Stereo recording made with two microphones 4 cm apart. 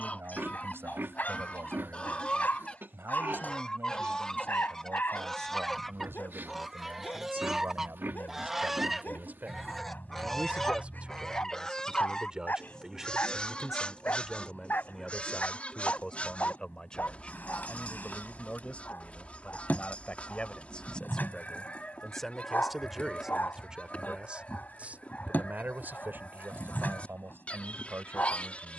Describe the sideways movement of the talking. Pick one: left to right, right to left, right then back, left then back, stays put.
left then back.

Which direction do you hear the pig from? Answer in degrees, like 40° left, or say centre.
60° right.